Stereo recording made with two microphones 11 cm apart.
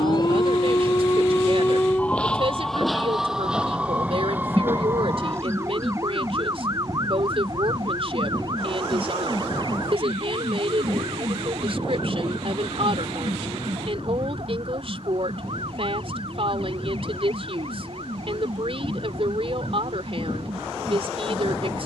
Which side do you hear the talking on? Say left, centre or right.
right.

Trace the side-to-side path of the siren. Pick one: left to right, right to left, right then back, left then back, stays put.
left to right.